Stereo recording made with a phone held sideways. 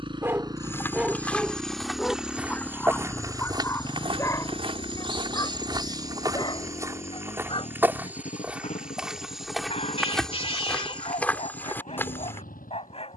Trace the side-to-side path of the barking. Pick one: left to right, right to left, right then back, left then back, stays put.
right to left.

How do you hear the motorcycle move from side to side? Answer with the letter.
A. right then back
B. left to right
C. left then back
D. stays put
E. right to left
E.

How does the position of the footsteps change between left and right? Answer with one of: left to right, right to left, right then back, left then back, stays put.
right then back.